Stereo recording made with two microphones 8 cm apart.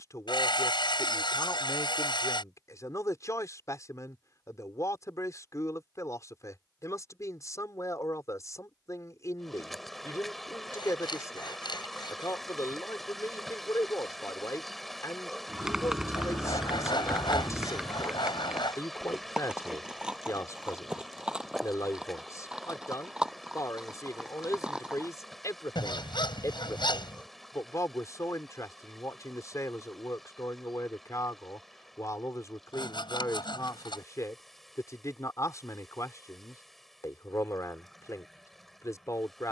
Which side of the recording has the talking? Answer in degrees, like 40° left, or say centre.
40° left.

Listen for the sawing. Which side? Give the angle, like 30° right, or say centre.
70° left.